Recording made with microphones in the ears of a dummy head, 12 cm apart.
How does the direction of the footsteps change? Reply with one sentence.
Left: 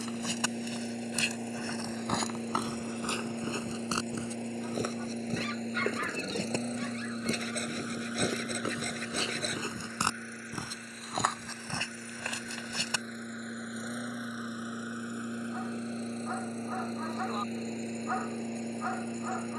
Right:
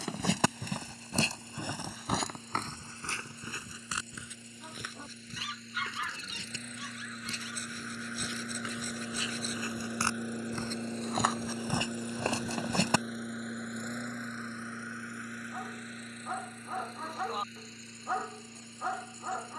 In this clip you hear the footsteps move from right to left and back again.